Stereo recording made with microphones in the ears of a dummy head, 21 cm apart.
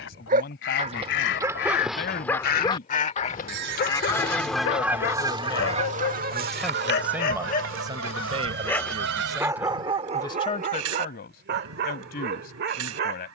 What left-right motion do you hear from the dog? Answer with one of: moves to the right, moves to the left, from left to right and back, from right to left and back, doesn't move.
from right to left and back.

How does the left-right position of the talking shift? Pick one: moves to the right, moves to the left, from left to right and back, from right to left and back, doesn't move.
from left to right and back.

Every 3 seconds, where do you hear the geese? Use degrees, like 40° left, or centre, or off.
50° left, centre, 60° right, 70° right, 80° right.